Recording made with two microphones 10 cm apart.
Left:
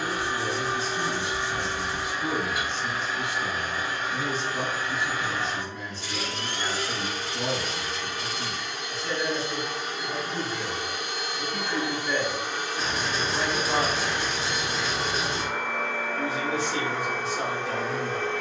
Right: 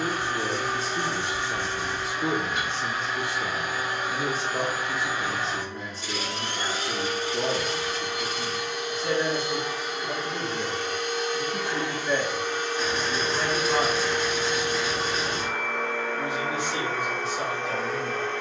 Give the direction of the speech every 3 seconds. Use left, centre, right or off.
right, right, right, right, centre, left.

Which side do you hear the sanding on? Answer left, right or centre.
left.